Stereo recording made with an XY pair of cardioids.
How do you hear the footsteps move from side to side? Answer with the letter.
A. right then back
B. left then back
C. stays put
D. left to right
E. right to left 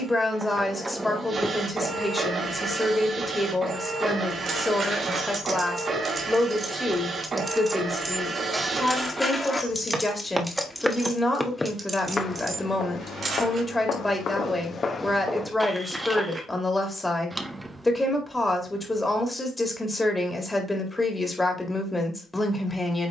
B.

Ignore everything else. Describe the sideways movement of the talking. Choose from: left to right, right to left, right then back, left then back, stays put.
stays put.